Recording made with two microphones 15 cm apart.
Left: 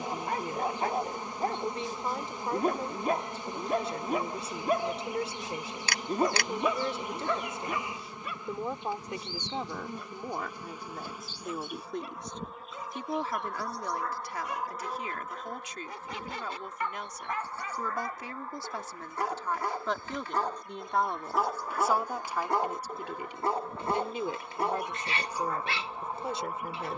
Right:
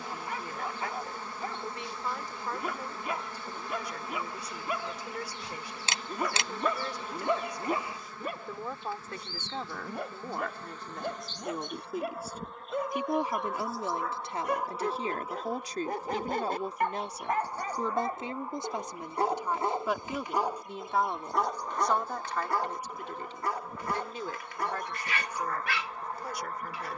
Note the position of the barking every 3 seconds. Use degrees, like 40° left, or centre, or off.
40° left, 40° left, 20° right, 60° right, 60° right, 50° right, 20° right, 20° left, 30° left.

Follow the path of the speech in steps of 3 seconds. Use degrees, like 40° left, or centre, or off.
30° left, 30° left, 20° left, 10° left, 20° right, 40° right, 10° right, 10° left, 20° left.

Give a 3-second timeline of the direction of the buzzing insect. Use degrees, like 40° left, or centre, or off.
20° left, 20° left, 20° left, 10° left, centre, 10° right, 20° right, 10° right, 10° left.